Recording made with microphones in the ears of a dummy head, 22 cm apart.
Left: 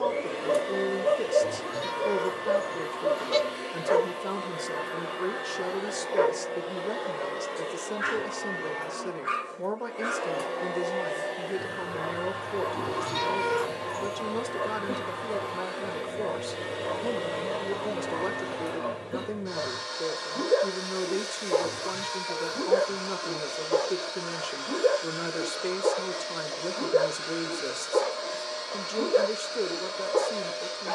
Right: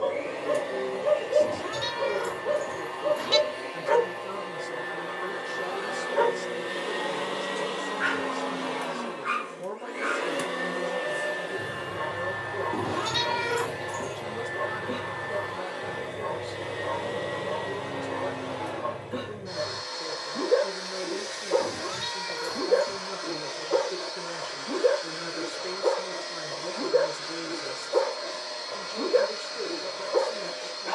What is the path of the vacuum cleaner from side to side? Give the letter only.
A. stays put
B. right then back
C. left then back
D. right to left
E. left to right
B.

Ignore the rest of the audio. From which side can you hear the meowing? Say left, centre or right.
right.